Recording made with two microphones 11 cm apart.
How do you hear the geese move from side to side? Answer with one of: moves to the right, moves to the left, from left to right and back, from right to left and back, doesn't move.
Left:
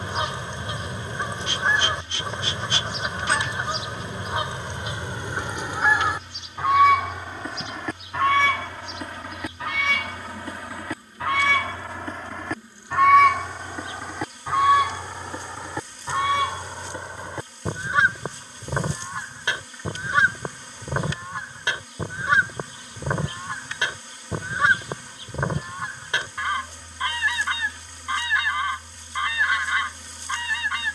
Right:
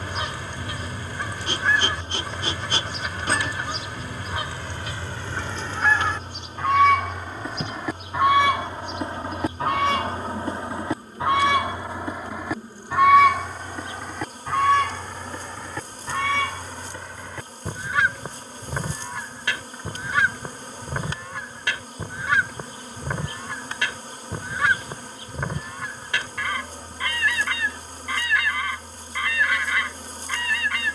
from left to right and back.